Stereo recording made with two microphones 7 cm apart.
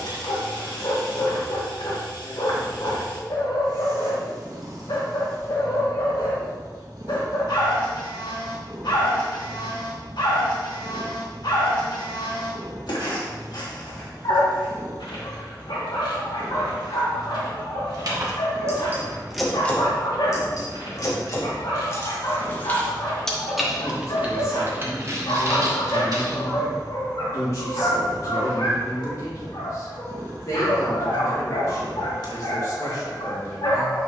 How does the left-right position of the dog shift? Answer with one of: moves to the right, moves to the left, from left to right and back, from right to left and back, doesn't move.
doesn't move.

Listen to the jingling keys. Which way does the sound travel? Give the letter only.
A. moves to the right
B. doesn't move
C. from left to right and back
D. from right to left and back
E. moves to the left
D.